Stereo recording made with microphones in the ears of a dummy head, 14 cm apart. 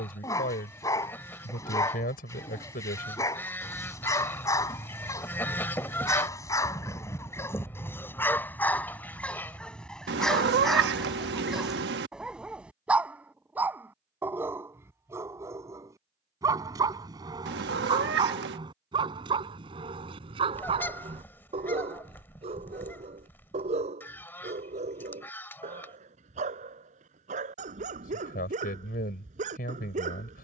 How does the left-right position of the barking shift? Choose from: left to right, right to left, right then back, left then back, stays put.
left to right.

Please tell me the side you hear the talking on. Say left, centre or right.
left.